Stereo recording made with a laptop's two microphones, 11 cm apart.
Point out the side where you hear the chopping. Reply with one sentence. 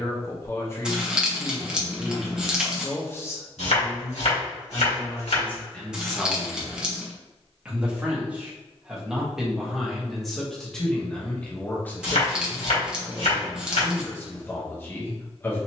You can hear the chopping on the left.